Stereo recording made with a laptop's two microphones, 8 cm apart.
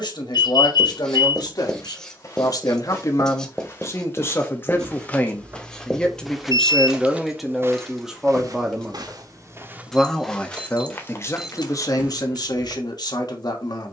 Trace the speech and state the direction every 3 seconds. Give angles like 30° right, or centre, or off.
60° left, 30° left, centre, 30° left, 60° left.